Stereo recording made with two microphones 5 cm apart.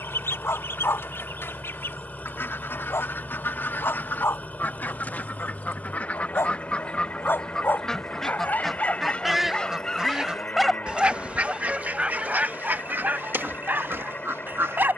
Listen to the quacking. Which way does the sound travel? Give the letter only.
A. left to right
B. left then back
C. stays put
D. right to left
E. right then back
A.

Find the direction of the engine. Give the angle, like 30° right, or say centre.
30° left.